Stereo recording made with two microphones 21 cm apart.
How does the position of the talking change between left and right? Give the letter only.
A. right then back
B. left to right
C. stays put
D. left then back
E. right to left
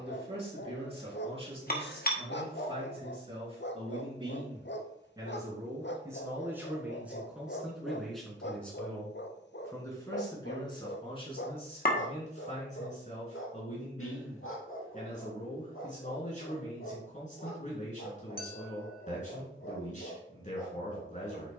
E.